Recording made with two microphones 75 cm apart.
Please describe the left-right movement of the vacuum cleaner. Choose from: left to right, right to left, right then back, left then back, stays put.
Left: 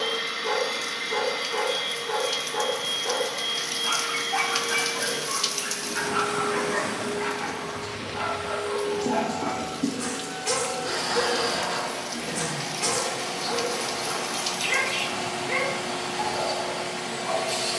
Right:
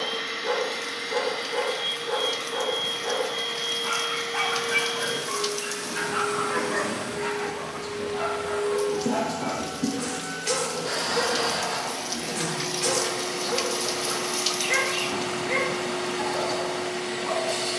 right then back.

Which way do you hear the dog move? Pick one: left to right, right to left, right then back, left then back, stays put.
left then back.